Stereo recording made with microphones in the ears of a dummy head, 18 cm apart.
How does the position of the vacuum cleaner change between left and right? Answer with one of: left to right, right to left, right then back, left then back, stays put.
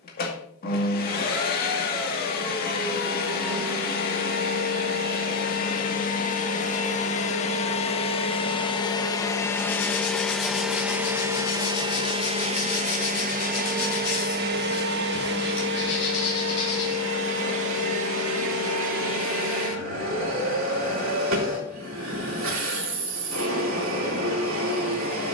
left to right.